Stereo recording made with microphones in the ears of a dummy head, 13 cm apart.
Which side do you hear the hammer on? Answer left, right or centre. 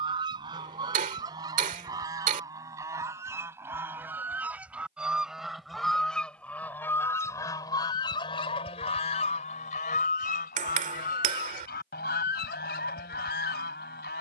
right.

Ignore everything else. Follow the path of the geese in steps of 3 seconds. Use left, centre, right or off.
right, centre, left, left, left.